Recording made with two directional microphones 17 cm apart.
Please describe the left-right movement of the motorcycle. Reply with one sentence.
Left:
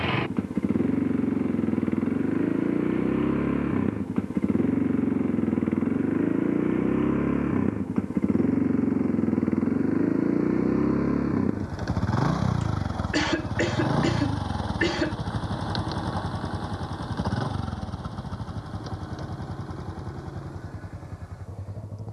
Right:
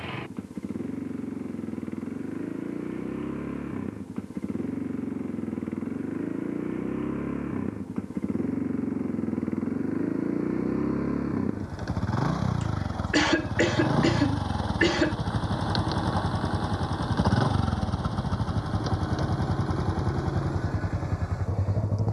You can hear the motorcycle move to the right.